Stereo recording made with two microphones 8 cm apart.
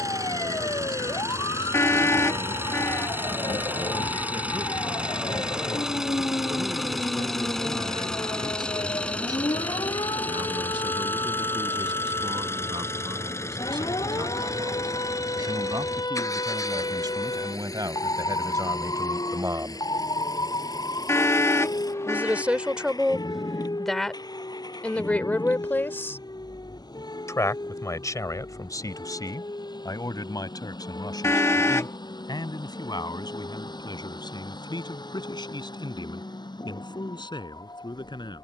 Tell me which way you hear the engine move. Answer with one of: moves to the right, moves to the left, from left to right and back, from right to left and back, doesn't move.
moves to the left.